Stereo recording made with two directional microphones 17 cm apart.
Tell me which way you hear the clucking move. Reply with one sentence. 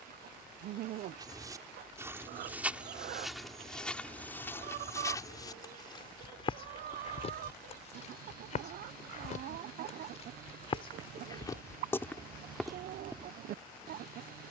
You can hear the clucking stay put.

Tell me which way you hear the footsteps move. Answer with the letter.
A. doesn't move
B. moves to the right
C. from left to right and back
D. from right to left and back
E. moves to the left
D.